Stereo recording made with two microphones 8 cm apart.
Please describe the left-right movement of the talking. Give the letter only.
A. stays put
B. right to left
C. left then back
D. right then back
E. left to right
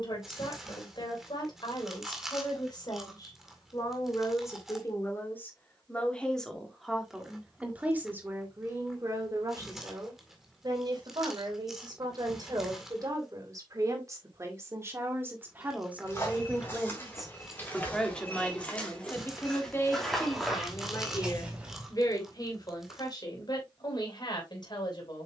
D.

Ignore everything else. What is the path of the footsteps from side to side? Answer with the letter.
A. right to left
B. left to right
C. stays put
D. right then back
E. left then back
B.